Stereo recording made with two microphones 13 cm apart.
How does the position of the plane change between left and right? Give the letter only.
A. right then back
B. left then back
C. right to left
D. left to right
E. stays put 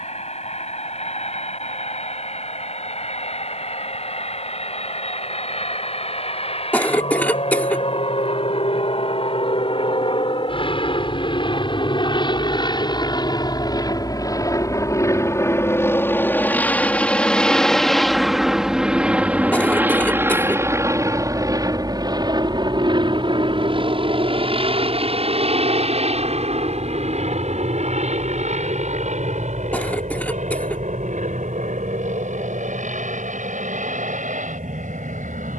D.